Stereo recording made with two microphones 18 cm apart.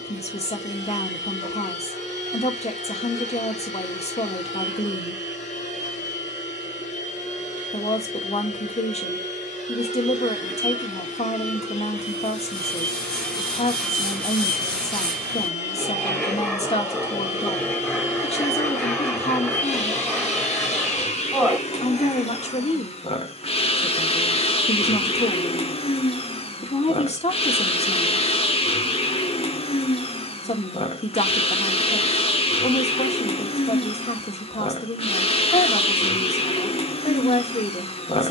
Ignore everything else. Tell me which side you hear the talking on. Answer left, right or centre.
left.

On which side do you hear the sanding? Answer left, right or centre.
centre.